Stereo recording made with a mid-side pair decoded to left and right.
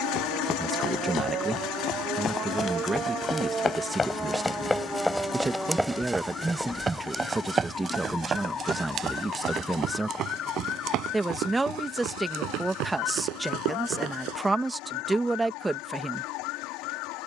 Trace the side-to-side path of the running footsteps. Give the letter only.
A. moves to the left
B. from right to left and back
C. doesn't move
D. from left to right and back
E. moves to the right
E.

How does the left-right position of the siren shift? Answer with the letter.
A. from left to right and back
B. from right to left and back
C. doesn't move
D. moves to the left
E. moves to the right
D.